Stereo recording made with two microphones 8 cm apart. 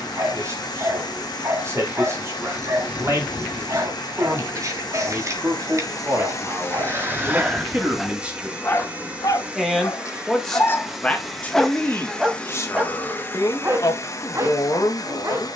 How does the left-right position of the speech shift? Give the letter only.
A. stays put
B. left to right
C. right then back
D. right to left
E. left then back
D.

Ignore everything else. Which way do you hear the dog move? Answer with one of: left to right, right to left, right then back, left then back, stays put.
left then back.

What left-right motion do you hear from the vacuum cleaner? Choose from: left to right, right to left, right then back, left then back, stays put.
right then back.